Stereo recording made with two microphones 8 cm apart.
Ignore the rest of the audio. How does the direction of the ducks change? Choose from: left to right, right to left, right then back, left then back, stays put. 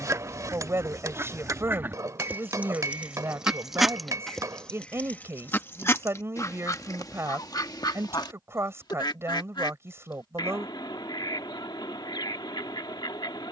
right to left.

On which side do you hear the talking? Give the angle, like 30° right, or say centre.
30° right.